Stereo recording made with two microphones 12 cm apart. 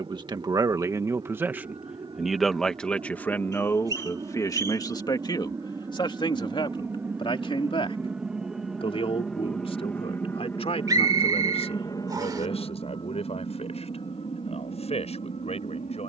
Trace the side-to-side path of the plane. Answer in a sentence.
You can hear the plane move from right to left.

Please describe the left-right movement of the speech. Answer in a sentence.
You can hear the speech go from the right side to the left.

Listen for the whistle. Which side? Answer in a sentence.
You can hear the whistle on the right.